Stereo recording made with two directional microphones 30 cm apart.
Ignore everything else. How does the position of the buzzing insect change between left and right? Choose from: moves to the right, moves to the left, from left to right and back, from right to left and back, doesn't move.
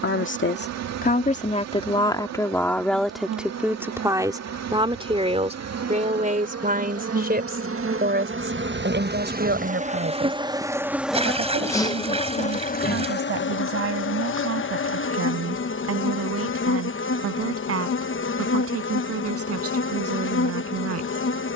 moves to the left.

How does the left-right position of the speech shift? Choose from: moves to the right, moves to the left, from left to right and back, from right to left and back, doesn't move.
moves to the right.